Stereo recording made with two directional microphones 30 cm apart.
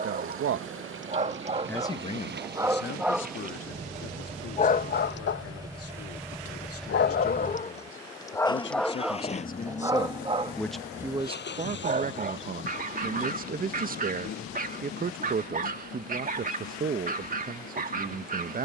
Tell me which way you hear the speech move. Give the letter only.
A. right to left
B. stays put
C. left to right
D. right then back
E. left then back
E.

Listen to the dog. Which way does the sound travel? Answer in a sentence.
You can hear the dog move from right to left and back again.